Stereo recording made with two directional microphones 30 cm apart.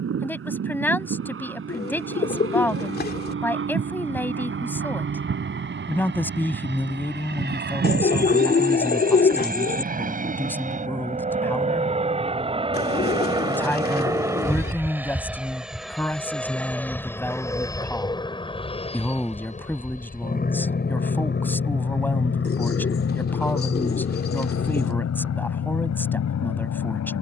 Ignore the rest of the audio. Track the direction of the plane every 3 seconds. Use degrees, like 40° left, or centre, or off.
50° right, 40° right, 40° right, 30° right, 10° right, centre, 20° left, 40° left, 50° left.